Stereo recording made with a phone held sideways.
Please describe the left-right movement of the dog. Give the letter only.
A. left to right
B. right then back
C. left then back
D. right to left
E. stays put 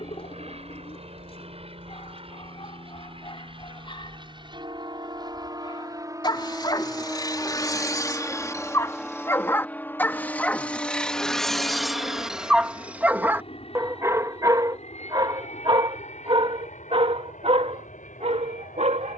A.